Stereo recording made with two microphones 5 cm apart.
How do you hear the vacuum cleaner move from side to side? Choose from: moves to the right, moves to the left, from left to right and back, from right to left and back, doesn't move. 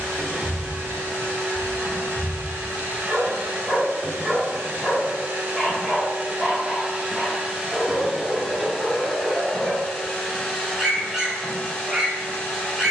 moves to the left.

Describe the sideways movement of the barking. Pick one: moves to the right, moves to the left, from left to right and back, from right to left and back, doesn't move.
doesn't move.